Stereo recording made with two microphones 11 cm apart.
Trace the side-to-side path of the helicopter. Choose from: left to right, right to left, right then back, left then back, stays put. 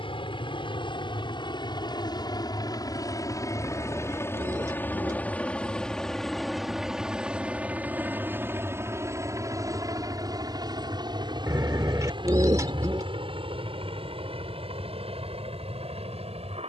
left to right.